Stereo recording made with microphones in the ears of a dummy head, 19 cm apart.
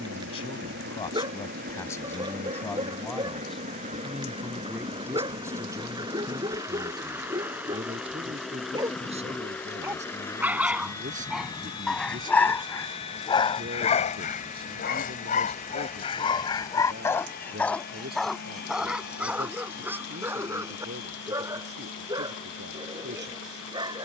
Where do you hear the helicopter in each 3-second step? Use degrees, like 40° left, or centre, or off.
50° right, 30° right, 10° right, 10° left, 30° left, 40° left, 50° left, 50° left.